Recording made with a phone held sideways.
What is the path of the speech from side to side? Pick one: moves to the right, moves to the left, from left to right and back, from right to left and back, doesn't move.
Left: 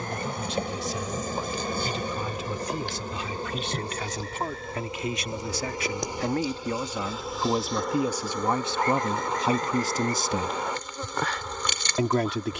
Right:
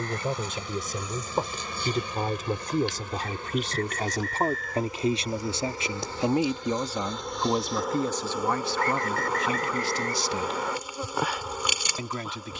moves to the left.